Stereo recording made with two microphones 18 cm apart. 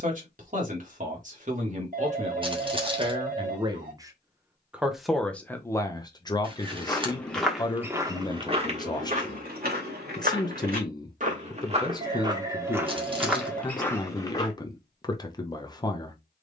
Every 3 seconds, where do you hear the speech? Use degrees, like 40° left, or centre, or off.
40° right, 10° right, 20° left, 20° left, 20° left, 20° left.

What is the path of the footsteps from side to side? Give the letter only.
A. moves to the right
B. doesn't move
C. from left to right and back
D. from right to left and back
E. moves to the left
C.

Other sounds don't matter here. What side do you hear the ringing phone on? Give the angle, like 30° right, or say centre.
50° right.